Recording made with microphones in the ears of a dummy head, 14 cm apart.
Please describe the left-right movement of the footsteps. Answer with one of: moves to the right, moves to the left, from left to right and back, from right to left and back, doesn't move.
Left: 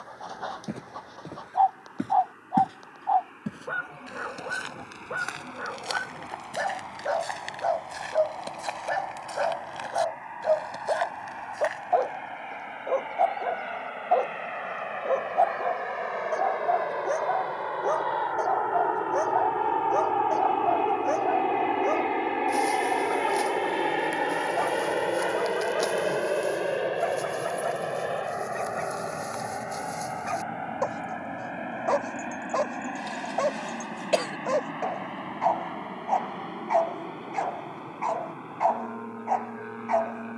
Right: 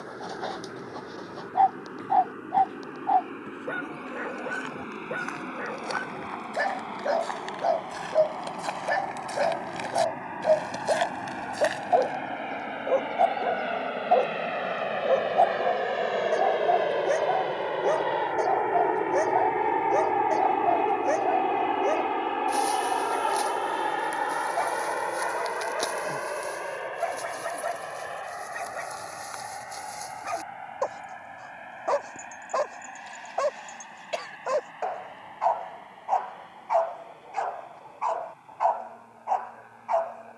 moves to the right.